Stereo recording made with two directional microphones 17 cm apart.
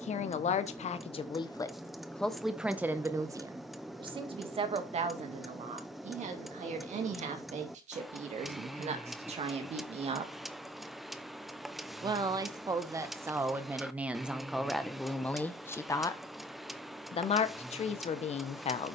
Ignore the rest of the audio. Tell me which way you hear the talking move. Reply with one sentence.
In this clip you hear the talking move from left to right and back again.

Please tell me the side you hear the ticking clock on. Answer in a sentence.
You can hear the ticking clock in the centre.